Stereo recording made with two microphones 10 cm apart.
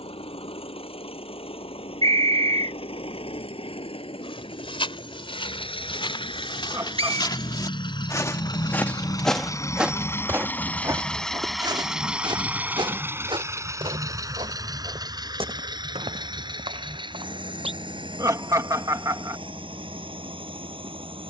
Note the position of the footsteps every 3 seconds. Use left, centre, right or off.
off, left, left, right, right, right, off.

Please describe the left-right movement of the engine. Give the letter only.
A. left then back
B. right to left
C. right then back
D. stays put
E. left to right
E.